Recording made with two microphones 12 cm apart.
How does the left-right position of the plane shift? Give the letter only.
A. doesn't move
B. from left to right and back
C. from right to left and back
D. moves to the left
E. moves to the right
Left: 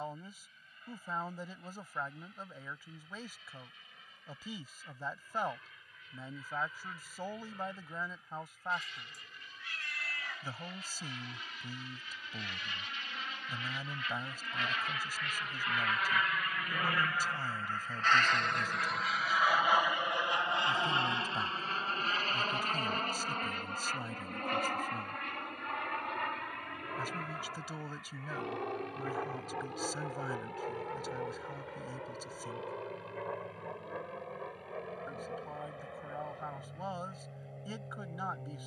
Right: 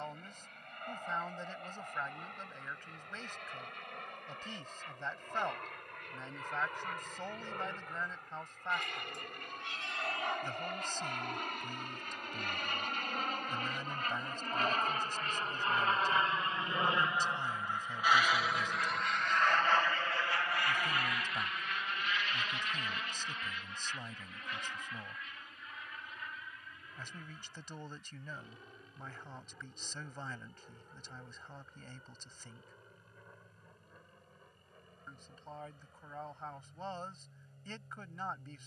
D.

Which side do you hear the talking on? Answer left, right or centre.
centre.